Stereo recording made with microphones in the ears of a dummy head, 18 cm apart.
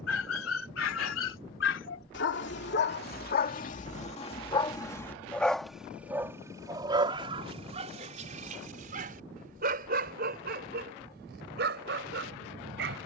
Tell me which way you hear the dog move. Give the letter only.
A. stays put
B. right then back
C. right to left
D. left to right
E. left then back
D.